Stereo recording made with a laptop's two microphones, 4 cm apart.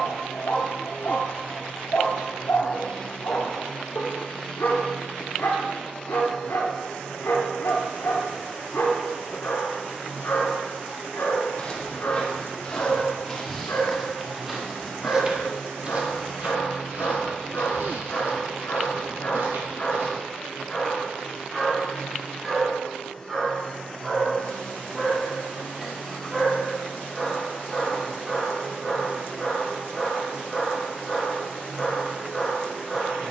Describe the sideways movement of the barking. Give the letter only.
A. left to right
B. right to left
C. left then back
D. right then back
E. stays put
A.